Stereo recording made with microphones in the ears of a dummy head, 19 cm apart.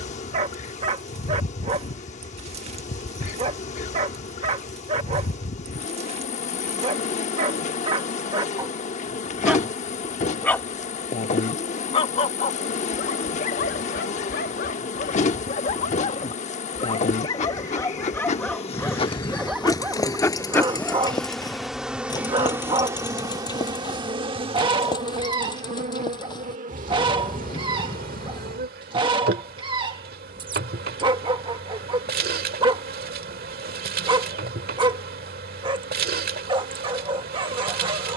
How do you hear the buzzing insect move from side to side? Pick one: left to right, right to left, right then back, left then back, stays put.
left to right.